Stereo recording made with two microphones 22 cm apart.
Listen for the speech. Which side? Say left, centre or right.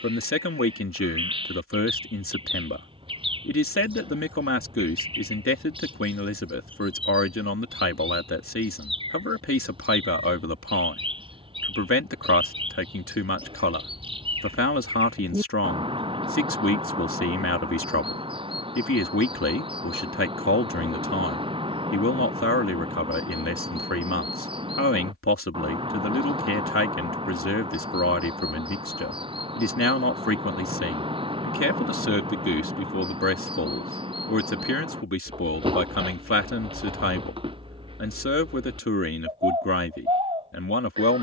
left.